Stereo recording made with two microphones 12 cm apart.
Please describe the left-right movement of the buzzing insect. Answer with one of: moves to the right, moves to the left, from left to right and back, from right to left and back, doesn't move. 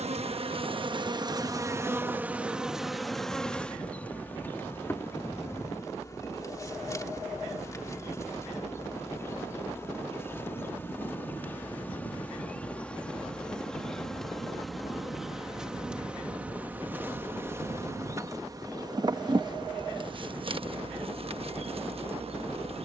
from right to left and back.